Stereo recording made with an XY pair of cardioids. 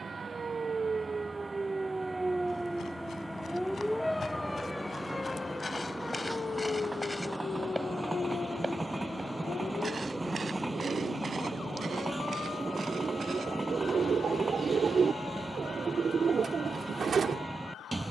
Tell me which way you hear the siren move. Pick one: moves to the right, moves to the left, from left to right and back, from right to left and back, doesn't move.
moves to the left.